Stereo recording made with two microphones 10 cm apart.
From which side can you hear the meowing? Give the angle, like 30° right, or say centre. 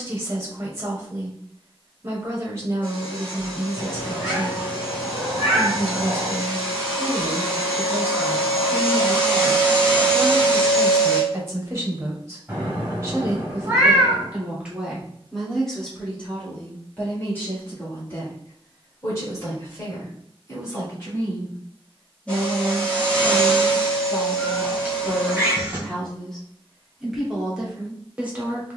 20° right.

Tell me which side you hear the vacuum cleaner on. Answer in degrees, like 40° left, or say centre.
10° left.